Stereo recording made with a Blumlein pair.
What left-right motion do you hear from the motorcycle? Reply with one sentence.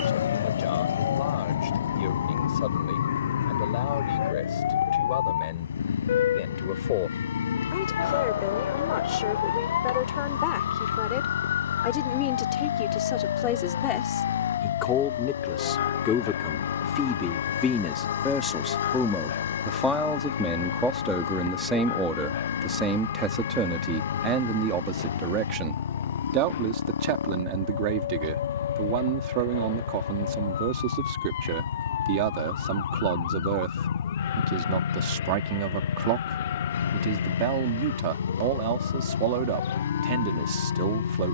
You can hear the motorcycle stay put.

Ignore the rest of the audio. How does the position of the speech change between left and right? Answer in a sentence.
In this clip you hear the speech go from the left side to the right.